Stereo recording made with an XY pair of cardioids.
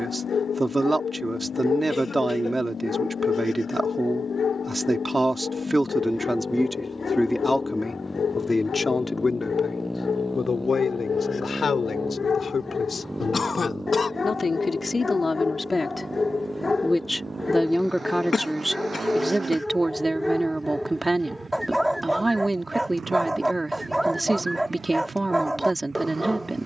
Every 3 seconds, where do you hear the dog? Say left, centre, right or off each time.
left, left, left, left, left, left, centre, centre, centre.